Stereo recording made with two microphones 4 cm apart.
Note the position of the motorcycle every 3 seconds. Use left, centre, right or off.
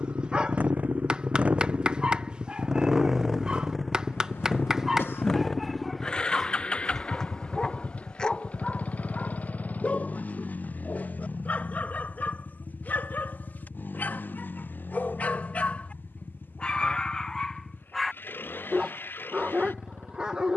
right, centre, left, left, left, left, left.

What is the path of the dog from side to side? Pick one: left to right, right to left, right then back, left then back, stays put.
left then back.